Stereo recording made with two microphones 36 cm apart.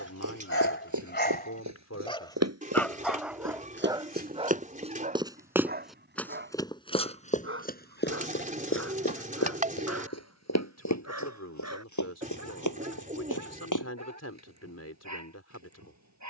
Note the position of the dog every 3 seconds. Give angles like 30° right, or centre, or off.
20° left, 20° right, 40° right, 50° right, 50° right, 50° right.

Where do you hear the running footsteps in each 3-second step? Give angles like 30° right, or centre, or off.
50° right, 20° right, 20° left, 50° left, 60° left, off.